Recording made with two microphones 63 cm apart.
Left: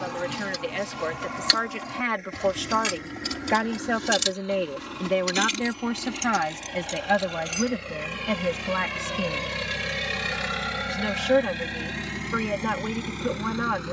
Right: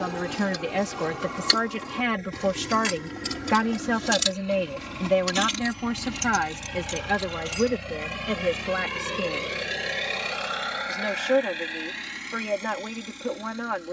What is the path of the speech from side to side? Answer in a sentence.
In this clip you hear the speech go from the right side to the left.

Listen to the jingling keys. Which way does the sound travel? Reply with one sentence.
In this clip you hear the jingling keys travel towards the right.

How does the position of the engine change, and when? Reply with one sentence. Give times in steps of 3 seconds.
In this clip you hear the engine on the right from 0 s and on the left from 9 s.